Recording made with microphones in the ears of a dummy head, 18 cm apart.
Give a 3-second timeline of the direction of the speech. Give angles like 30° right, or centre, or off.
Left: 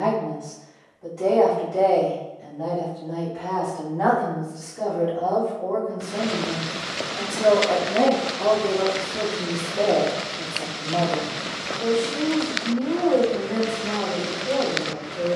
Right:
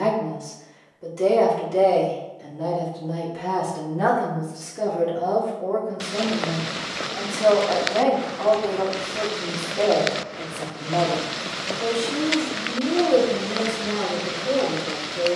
50° right, 30° right, 20° left, centre, 40° right.